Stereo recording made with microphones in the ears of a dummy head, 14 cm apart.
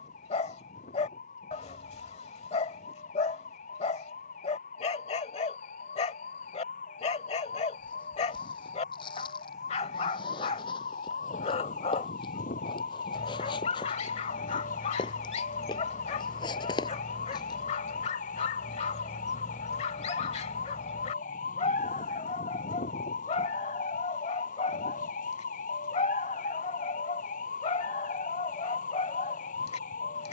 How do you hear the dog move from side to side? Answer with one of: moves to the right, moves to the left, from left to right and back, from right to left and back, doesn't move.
doesn't move.